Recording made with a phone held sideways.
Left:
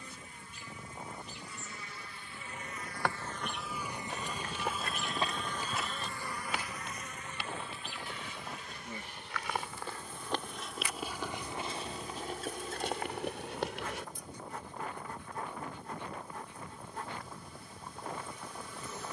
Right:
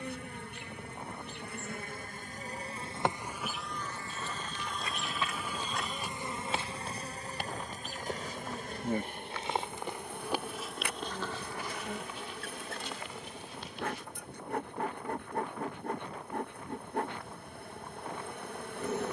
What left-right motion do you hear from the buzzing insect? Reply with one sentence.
You can hear the buzzing insect move from right to left and back again.